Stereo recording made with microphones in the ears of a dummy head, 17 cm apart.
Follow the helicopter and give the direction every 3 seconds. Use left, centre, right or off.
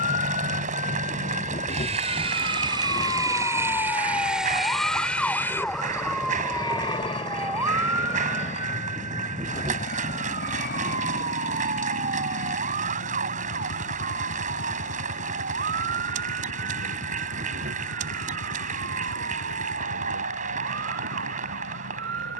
right, centre, left, left, left, left, left, left.